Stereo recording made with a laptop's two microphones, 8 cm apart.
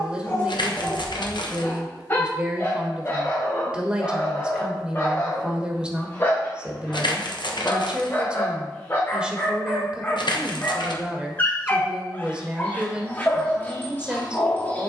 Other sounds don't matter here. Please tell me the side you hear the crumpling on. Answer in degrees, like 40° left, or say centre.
70° left.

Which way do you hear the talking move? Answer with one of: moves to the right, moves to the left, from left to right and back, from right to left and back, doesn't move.
doesn't move.